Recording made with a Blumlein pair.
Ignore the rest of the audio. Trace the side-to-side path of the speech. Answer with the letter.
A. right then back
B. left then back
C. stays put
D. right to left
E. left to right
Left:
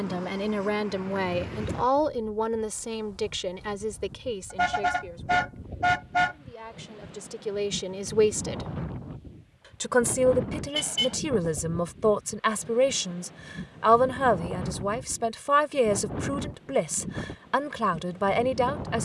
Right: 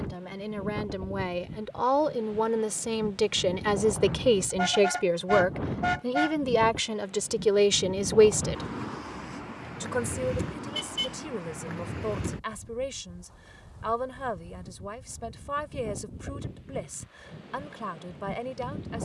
A.